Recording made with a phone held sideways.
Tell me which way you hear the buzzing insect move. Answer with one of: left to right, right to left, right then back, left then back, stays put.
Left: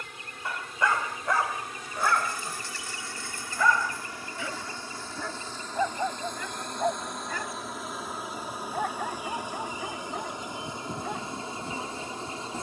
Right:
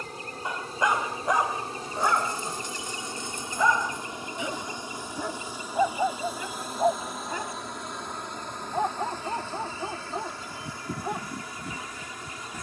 right to left.